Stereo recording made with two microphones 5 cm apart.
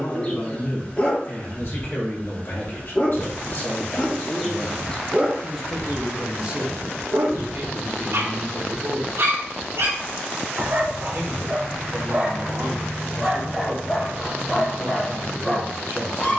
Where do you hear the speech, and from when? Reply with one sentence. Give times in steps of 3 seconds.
In this clip you hear the speech on the left from 0 s and on the right from 6 s.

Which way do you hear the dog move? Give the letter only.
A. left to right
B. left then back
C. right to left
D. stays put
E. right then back
E.